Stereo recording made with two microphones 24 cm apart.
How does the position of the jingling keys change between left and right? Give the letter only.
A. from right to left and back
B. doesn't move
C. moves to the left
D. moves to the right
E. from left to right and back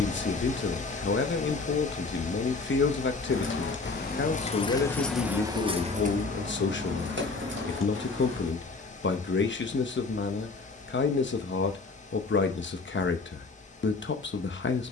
D.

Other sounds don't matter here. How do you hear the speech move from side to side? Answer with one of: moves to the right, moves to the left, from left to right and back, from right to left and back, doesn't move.
doesn't move.